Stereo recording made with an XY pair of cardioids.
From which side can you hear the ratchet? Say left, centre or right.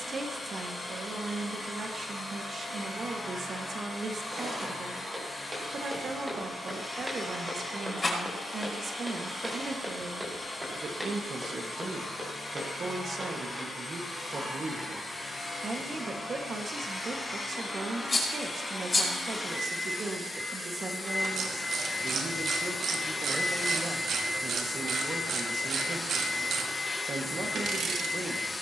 right.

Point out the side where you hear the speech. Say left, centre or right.
right.